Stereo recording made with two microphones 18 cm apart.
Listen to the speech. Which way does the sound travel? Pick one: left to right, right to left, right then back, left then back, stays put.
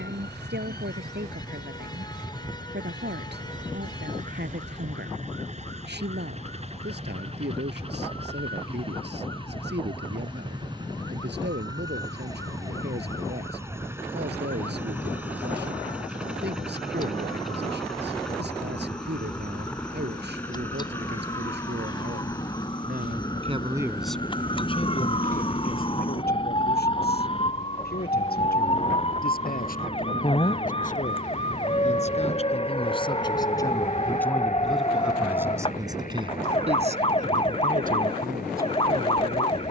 left then back.